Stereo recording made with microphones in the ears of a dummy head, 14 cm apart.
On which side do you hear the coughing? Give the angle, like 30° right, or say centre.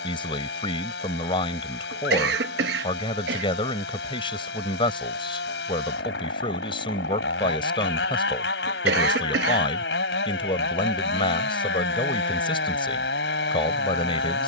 70° right.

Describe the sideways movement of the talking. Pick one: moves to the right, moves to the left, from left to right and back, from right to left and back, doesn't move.
doesn't move.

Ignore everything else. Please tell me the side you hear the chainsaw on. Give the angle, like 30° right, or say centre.
80° left.